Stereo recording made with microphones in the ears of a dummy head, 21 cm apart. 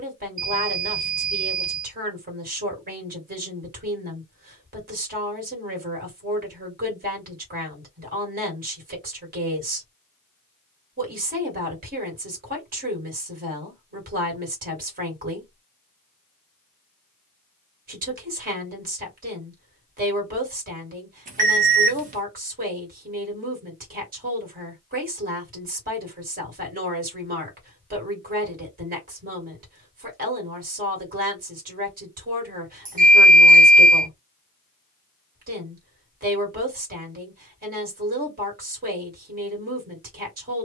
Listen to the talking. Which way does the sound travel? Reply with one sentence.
In this clip you hear the talking stay in one place.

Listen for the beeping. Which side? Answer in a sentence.
You can hear the beeping on the right.